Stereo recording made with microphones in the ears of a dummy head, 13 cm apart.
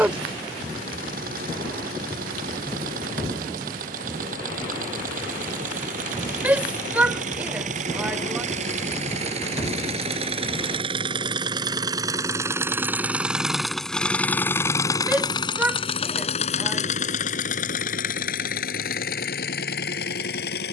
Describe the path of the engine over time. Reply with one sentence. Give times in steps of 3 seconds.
In this clip you hear the engine on the right from 0 s, in the centre from 12 s and on the left from 15 s.